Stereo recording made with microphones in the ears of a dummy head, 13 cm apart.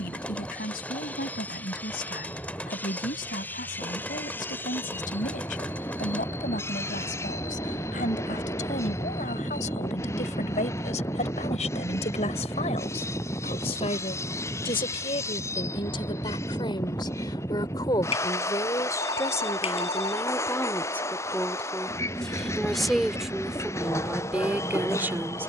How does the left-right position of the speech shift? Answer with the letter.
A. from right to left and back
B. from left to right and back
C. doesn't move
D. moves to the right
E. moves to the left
D.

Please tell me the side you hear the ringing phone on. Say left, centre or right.
left.